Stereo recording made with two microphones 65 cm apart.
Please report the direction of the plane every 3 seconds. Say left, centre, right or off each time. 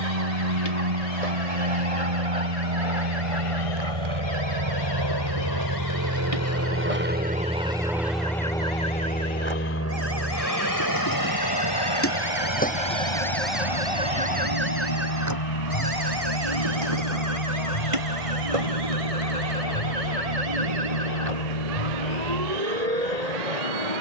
right, right, centre, left, left, left, left, left.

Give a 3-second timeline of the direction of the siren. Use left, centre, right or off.
left, left, left, left, centre, right, right, right.